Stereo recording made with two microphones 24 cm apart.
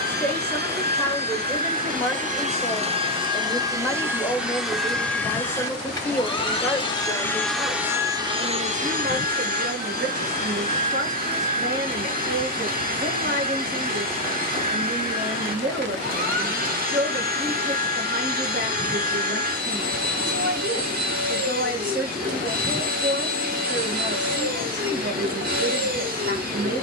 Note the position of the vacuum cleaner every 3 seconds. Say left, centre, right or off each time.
right, centre, centre, right, right, right, right, right, right.